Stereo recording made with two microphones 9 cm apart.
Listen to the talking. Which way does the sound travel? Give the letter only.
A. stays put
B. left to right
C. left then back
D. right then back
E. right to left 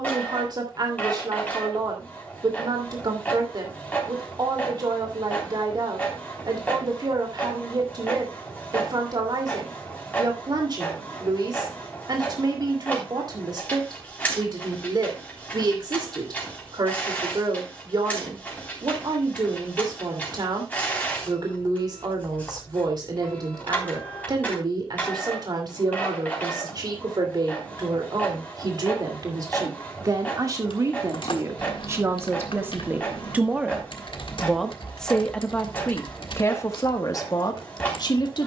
E.